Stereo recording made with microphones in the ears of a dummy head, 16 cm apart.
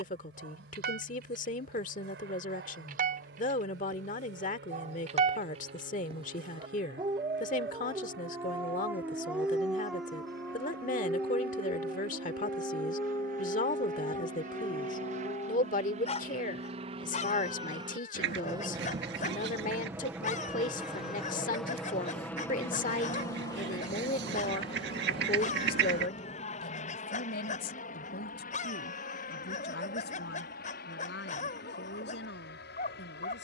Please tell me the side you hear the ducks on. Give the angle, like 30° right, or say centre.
70° right.